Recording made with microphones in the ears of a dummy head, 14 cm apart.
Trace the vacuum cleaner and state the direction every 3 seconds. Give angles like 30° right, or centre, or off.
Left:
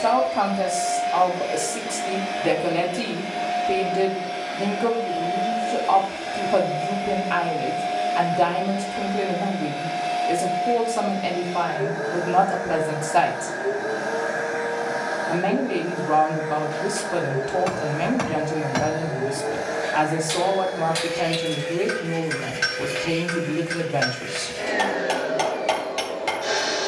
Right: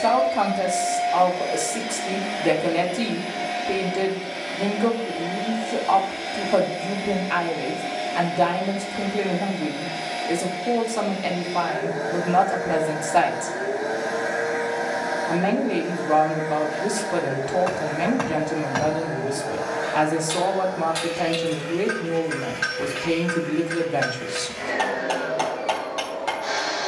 20° right, 20° right, 20° right, 20° right, 20° right, 10° right, centre, 20° left, 30° left.